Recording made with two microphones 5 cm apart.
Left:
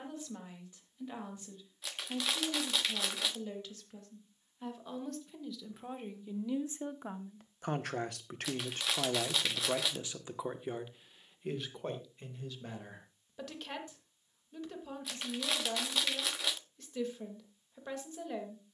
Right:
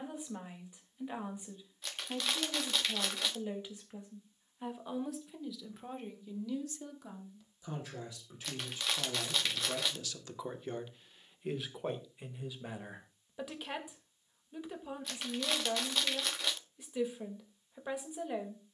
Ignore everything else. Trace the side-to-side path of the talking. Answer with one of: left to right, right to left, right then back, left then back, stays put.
left then back.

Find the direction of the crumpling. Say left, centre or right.
centre.